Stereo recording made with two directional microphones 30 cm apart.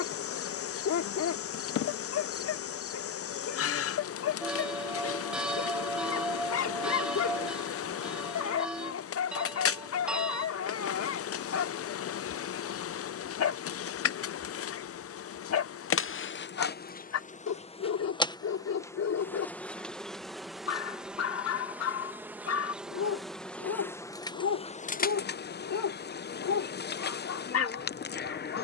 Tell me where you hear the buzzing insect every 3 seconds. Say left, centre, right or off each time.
left, left, left, left, left, left, centre, centre, left, left.